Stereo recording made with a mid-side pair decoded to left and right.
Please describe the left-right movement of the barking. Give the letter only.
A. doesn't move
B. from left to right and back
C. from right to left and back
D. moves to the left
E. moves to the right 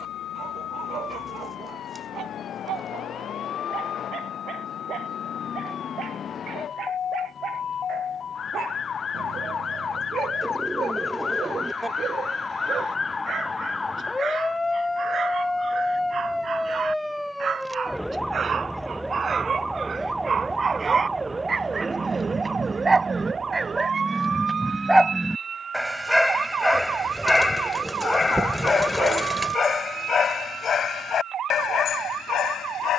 D.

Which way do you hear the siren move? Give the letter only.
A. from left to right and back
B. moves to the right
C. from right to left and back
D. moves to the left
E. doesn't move
B.